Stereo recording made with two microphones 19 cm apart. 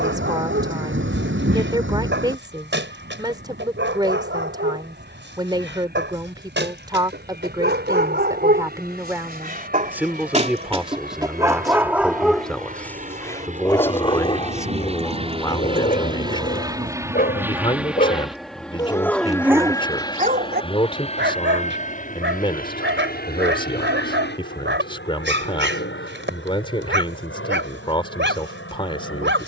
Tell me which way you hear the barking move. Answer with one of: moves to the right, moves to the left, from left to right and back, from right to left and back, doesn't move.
from right to left and back.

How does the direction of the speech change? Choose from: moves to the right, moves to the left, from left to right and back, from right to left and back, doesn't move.
moves to the left.